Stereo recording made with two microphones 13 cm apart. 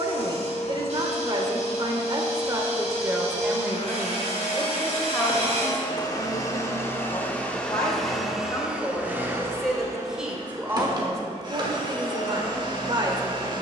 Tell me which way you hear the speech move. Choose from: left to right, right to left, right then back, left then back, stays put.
left then back.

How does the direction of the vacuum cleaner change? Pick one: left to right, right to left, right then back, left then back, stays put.
left to right.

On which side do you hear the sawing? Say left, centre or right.
right.